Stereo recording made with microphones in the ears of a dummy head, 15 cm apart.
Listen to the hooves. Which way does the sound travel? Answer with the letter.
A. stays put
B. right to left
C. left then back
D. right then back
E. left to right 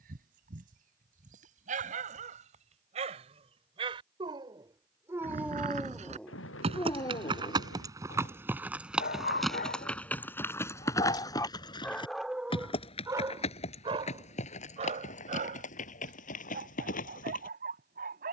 B.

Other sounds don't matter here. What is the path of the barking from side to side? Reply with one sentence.
In this clip you hear the barking move from right to left and back again.